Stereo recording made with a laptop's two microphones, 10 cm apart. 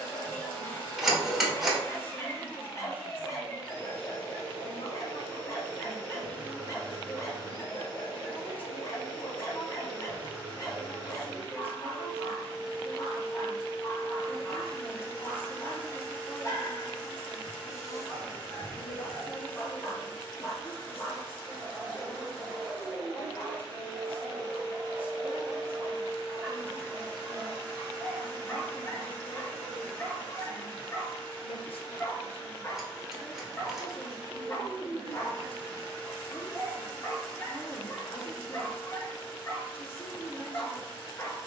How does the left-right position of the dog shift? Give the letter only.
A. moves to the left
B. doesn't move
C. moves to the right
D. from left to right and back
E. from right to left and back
D.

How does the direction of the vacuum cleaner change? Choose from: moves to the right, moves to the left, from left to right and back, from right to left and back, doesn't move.
doesn't move.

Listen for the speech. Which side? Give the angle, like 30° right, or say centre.
70° left.